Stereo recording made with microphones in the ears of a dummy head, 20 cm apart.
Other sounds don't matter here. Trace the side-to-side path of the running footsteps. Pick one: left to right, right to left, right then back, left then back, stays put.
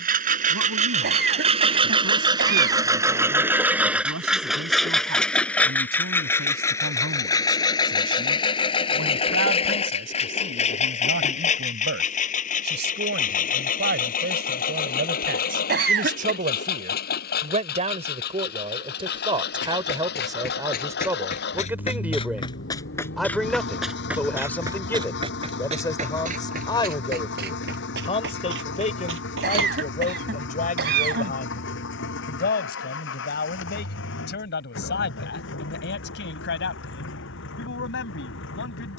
left to right.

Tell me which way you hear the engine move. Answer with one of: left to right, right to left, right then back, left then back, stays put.
right to left.